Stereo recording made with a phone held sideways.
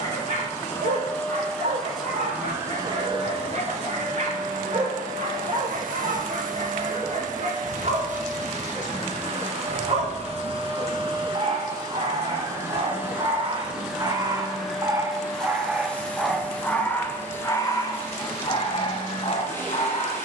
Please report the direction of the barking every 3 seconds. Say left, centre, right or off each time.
right, right, right, right, right, centre, left.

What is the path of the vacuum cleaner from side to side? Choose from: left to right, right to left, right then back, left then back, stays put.
right then back.